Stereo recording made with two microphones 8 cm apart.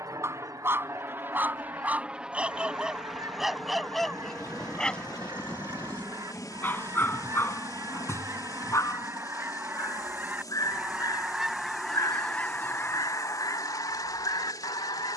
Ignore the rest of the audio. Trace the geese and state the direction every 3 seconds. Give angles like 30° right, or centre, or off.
50° right, 50° right, 40° right, 20° right, 40° left.